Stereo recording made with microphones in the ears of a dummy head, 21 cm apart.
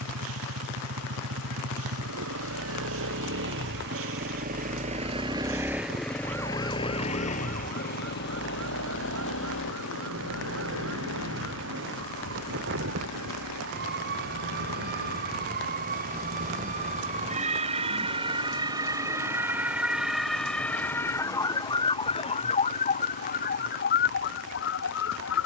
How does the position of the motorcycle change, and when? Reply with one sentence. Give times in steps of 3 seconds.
In this clip you hear the motorcycle on the right from 0 s and on the left from 6 s.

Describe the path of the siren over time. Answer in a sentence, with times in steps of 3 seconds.
In this clip you hear the siren on the right from 0 s, in the centre from 18 s and on the left from 21 s.